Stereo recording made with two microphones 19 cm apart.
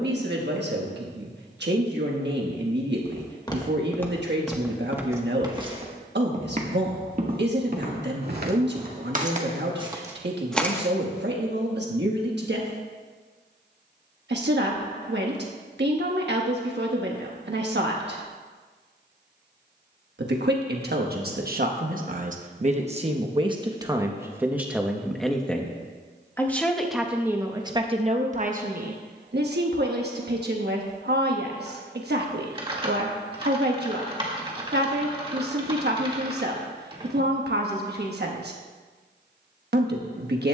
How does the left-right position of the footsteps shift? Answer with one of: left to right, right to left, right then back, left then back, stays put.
right then back.